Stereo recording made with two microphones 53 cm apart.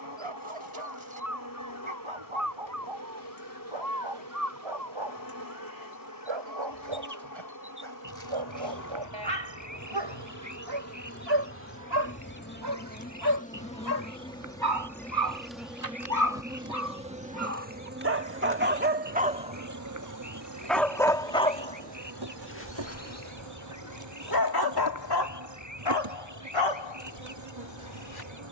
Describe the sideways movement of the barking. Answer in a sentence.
You can hear the barking move to the left.